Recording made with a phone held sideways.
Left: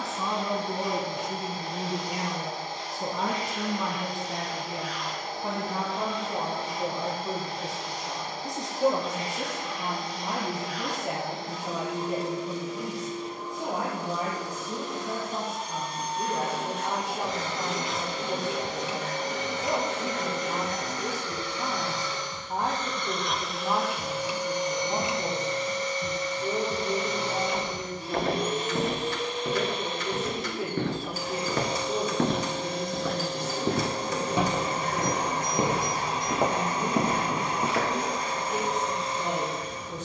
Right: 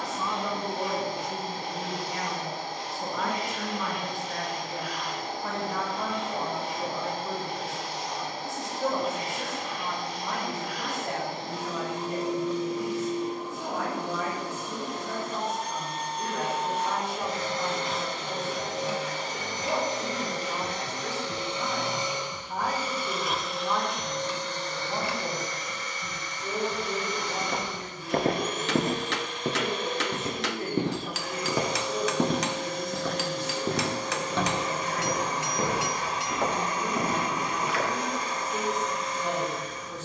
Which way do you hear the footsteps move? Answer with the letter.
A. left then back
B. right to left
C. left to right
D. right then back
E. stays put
B.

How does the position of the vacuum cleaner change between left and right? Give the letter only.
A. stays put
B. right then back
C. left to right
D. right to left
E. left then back
D.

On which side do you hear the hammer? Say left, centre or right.
right.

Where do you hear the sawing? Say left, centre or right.
left.